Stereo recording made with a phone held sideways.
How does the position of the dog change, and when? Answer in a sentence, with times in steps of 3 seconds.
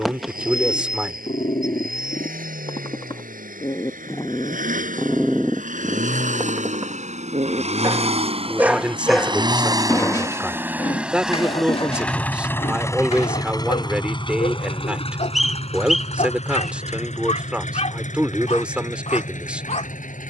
In this clip you hear the dog on the left from 0 s, in the centre from 3 s, on the right from 6 s and on the left from 9 s.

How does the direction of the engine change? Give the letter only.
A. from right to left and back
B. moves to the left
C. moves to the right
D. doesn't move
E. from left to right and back
B.